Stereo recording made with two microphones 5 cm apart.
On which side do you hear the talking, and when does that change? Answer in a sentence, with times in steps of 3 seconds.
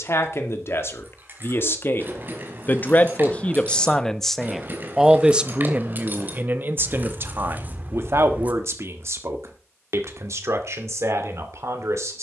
You can hear the talking on the left from 0 s, in the centre from 3 s and on the right from 6 s.